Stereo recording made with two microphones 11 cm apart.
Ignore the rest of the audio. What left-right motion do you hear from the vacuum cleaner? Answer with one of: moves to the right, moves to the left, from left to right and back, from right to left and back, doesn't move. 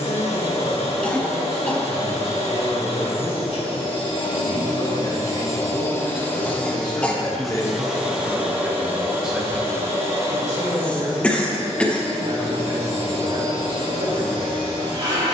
moves to the right.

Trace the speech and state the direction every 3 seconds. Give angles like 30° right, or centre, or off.
70° left, 60° left, 20° left, 20° right, 50° right.